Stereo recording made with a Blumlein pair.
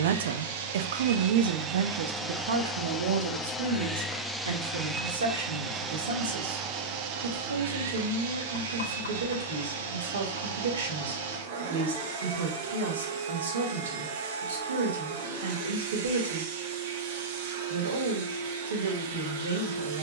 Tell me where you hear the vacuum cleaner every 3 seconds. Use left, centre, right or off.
right, centre, right, right, right, right, right.